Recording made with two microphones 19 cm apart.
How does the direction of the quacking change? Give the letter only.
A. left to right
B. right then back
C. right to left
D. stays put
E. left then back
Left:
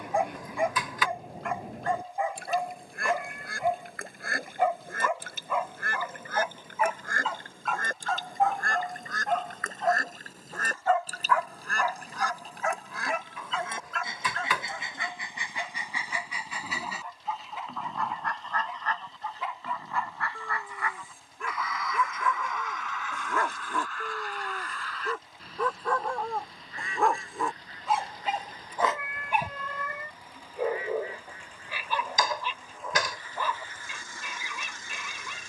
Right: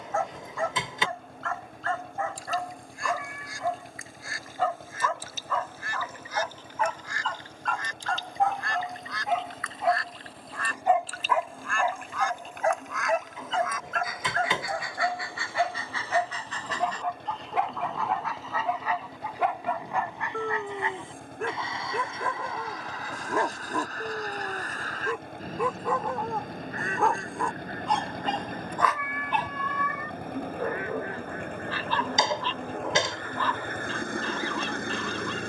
A.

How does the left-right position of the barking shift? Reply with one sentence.
You can hear the barking move from left to right and back again.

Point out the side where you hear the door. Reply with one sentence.
You can hear the door on the right.